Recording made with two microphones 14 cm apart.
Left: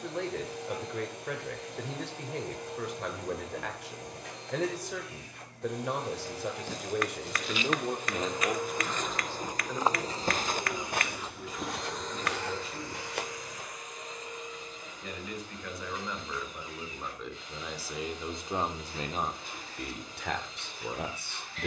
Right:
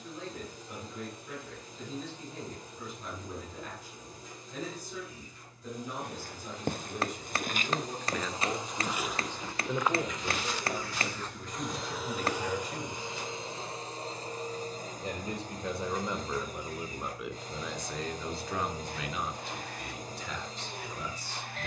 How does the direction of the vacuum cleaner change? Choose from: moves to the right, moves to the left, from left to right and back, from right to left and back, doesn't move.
moves to the right.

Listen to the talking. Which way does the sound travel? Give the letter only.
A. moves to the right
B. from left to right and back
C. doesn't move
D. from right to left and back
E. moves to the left
B.